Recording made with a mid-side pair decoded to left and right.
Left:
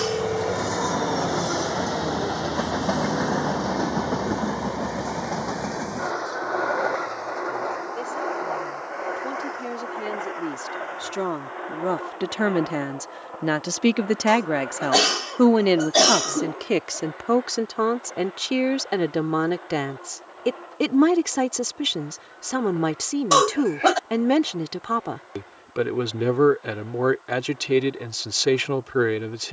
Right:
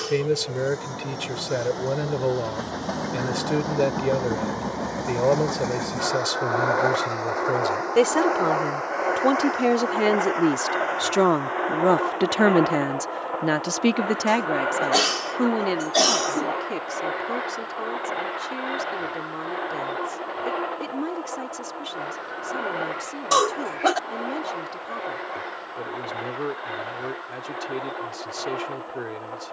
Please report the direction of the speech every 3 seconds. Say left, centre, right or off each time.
right, right, right, right, centre, left, left, left, left, left.